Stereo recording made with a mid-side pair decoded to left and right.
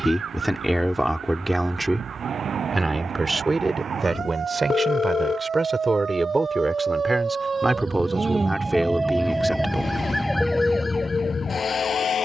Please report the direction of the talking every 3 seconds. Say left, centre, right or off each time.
centre, right, centre, centre.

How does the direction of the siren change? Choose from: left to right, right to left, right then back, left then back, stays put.
right to left.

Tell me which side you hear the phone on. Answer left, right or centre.
left.